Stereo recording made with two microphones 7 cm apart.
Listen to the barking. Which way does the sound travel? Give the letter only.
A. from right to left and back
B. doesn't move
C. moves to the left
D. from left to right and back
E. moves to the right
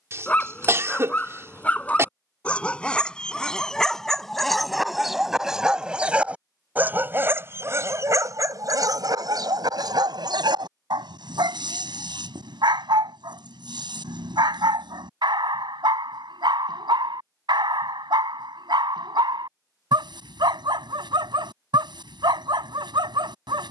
E.